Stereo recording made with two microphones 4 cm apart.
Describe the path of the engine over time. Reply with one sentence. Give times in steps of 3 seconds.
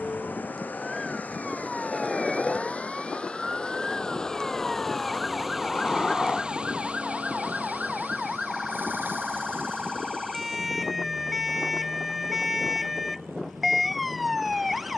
In this clip you hear the engine on the left from 0 s, in the centre from 3 s and on the right from 6 s.